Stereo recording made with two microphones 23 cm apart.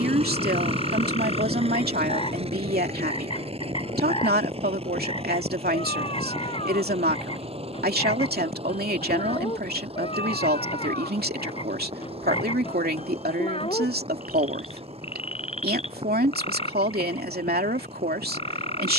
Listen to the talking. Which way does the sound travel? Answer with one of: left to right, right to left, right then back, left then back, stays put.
stays put.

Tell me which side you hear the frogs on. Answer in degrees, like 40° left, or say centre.
20° left.